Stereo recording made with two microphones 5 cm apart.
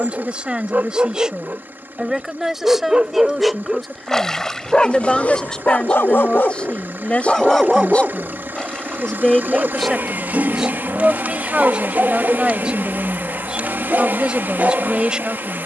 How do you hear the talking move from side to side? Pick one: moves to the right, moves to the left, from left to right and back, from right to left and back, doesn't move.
from right to left and back.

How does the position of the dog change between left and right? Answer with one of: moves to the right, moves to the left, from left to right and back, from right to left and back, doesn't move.
from right to left and back.